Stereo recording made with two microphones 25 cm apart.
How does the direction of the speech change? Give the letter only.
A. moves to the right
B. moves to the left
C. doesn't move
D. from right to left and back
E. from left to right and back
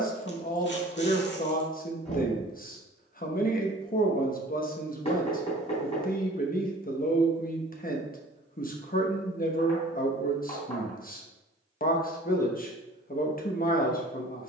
C.